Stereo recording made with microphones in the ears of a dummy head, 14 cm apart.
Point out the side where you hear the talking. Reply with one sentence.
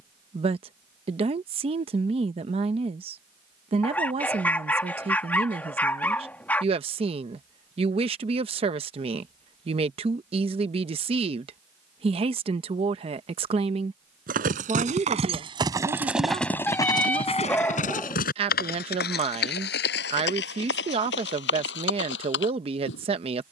You can hear the talking on the right.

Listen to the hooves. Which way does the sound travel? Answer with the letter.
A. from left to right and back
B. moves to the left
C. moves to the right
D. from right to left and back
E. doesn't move
B.